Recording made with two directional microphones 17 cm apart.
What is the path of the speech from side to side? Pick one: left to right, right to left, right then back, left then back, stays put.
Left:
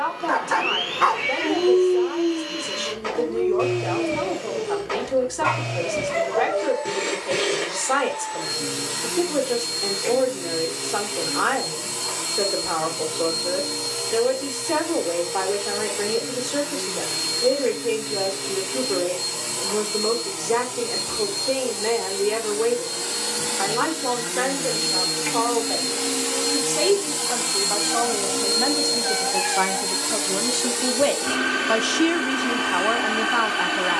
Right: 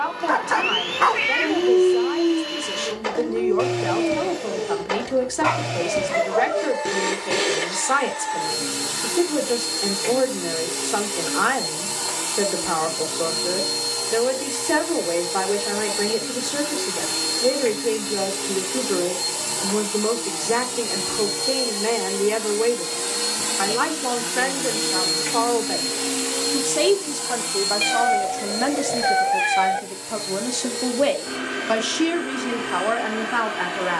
right to left.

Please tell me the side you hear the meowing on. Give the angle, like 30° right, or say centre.
70° right.